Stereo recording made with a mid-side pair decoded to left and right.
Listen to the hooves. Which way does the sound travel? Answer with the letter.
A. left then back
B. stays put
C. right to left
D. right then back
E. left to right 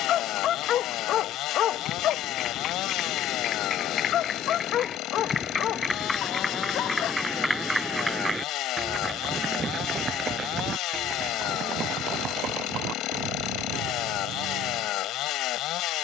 E.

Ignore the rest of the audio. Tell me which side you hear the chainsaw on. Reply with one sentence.
You can hear the chainsaw on the left.